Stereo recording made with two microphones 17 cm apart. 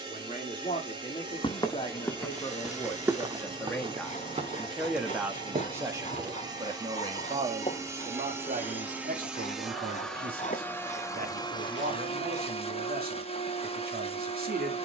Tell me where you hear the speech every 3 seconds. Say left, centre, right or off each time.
left, centre, right, right, right.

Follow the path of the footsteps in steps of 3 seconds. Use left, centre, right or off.
centre, right, right, off, off.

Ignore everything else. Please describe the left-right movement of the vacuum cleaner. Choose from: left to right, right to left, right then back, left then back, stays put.
right to left.